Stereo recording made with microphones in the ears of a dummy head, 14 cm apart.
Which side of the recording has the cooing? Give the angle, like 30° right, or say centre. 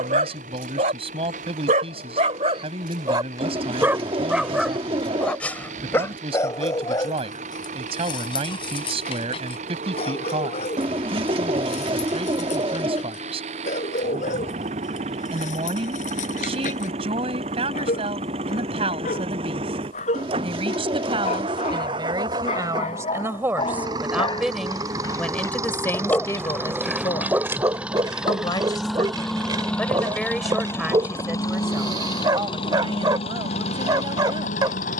30° right.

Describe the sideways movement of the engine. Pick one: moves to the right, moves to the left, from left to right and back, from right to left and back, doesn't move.
moves to the left.